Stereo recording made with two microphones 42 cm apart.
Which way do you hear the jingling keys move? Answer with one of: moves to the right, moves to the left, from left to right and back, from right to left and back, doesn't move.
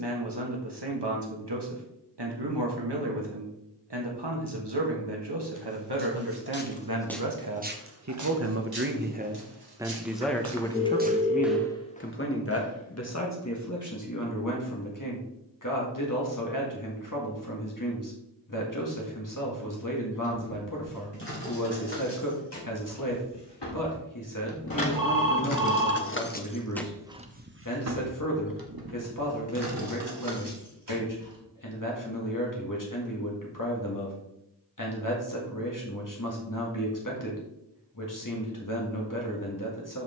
moves to the right.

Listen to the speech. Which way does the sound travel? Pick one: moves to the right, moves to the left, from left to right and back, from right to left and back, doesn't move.
moves to the left.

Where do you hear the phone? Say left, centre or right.
left.